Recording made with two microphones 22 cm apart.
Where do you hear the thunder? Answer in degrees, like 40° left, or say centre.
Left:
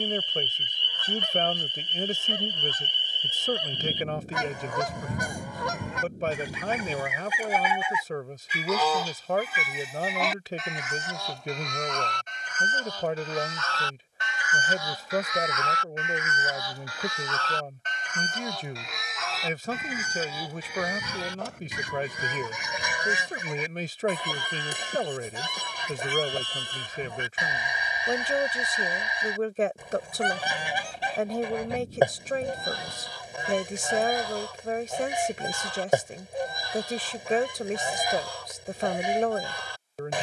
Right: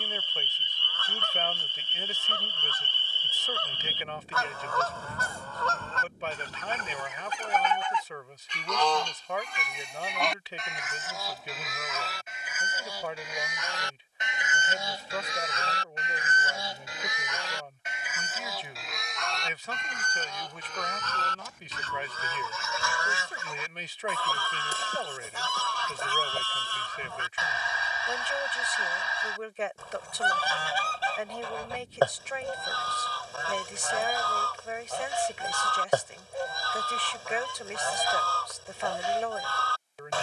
40° left.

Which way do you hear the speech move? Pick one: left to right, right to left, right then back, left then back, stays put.
stays put.